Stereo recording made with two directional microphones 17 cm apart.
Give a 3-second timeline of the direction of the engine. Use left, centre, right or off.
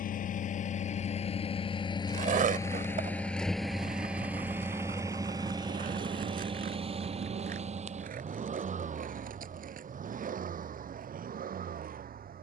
left, centre, right, right.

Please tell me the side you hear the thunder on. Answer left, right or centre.
right.